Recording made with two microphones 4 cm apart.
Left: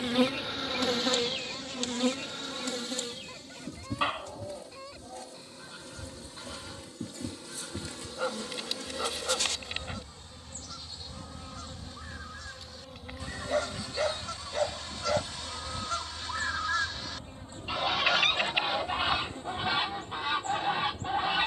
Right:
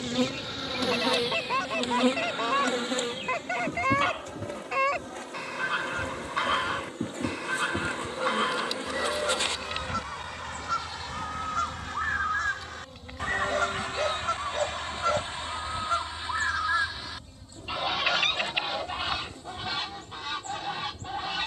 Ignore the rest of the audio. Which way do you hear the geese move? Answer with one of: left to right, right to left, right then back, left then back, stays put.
right to left.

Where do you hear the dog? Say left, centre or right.
centre.